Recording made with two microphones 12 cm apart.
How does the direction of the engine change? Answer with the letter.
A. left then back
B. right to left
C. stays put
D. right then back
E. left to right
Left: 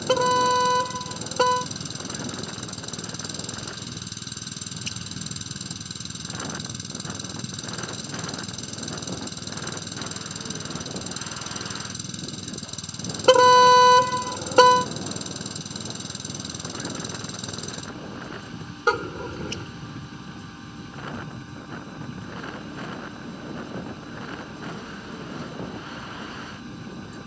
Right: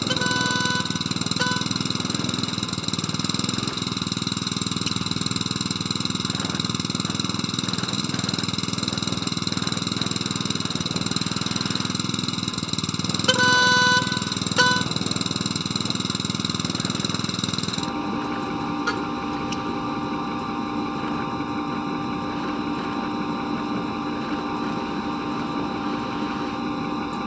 C.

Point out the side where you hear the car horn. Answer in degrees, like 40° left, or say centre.
50° left.